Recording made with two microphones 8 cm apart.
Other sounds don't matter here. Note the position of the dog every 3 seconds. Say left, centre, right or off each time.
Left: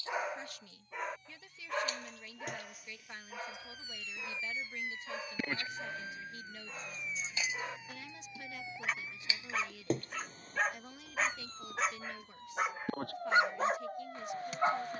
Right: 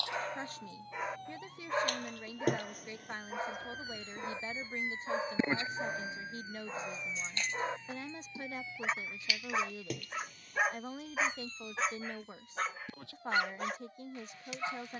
centre, right, right, centre, left.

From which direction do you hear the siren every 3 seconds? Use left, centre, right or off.
right, right, centre, left, left.